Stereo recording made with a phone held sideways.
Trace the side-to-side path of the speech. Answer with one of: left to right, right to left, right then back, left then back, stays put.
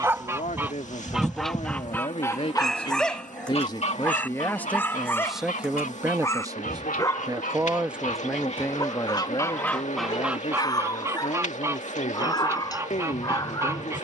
right then back.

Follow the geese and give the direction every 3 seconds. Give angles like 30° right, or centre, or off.
10° left, 60° left, 60° left, 10° right, 20° right.